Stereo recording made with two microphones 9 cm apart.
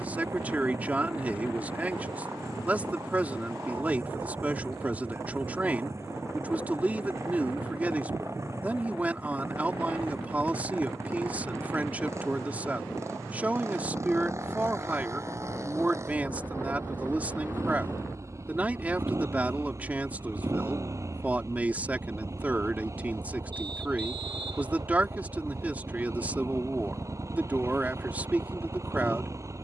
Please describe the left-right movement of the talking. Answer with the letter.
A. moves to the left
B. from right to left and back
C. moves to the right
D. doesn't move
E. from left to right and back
D.